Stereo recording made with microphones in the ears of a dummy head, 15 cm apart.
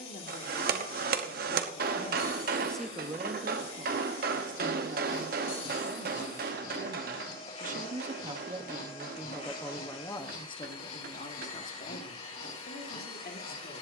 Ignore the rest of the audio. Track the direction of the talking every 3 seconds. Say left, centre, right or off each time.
left, right, right, left, left.